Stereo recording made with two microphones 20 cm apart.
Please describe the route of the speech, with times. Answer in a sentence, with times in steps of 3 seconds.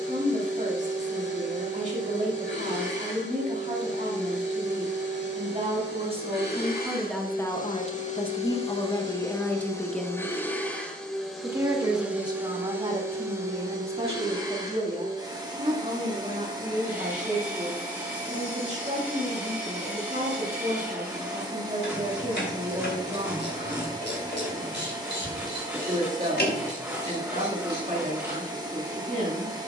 In this clip you hear the speech on the right from 0 s, in the centre from 6 s and on the right from 12 s.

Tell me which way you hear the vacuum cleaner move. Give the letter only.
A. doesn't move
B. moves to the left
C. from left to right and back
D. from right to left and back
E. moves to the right
E.